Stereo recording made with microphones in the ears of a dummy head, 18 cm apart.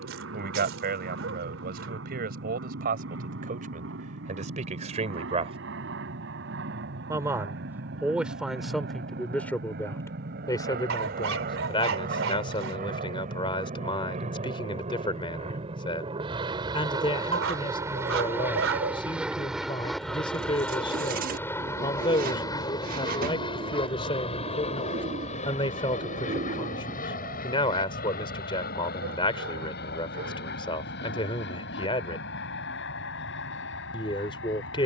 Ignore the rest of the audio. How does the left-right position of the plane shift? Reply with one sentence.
You can hear the plane move to the left.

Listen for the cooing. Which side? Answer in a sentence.
You can hear the cooing on the right.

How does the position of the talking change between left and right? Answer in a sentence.
You can hear the talking move from right to left.